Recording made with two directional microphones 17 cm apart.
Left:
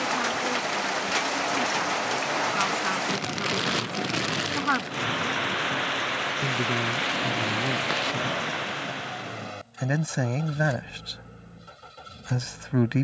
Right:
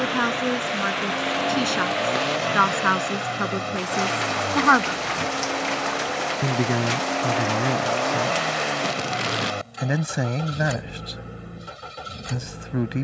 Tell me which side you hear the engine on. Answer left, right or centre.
right.